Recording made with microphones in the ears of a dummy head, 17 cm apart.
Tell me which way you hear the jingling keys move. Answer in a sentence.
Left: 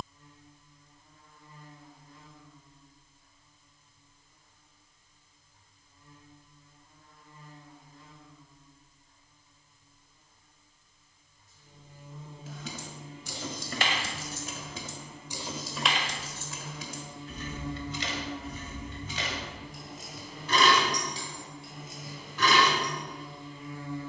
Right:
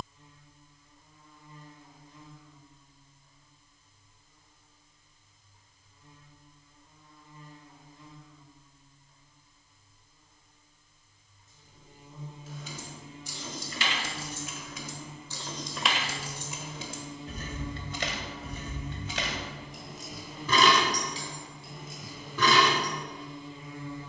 In this clip you hear the jingling keys travel towards the right.